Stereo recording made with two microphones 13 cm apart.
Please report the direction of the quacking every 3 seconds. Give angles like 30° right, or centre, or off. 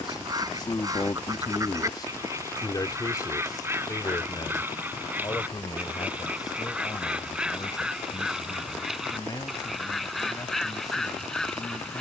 30° right, 20° right, 10° right, centre.